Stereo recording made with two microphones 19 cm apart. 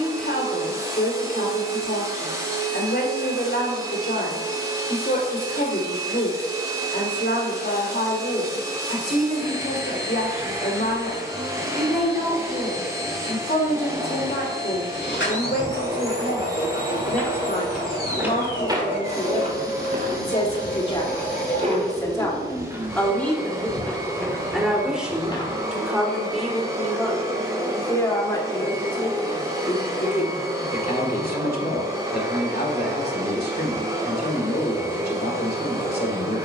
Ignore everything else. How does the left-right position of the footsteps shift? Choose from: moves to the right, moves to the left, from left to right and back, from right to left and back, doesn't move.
from left to right and back.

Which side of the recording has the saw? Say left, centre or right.
left.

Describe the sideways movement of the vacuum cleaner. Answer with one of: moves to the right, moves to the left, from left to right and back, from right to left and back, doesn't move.
doesn't move.